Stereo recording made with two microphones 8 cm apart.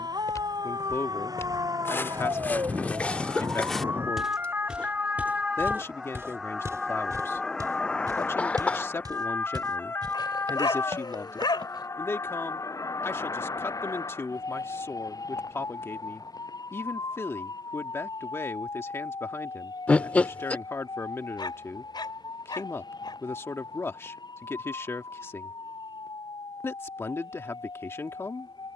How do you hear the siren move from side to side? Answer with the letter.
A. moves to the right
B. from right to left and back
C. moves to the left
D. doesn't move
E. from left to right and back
C.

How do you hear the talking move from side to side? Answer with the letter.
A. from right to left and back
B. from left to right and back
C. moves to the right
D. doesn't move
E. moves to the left
D.